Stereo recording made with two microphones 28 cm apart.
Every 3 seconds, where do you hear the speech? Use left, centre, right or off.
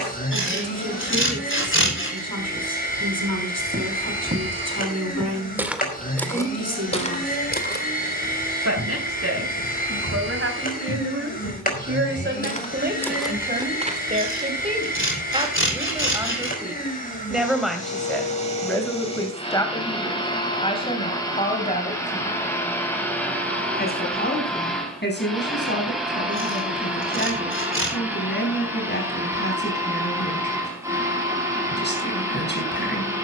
right, right, right, right, right, centre, centre, left, left, left, left.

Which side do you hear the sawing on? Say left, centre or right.
left.